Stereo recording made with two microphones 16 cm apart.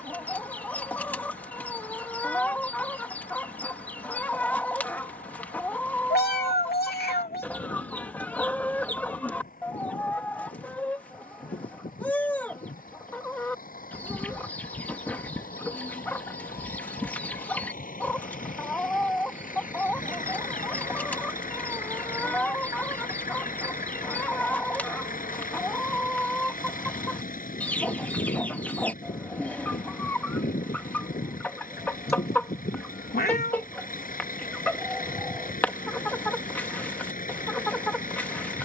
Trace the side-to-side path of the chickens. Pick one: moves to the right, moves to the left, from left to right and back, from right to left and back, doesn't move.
doesn't move.